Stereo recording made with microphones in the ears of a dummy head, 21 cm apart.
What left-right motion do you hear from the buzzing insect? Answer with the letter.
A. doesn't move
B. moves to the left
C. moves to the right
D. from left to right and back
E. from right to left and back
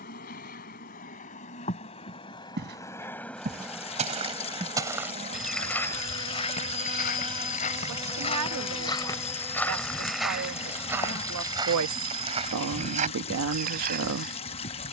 D.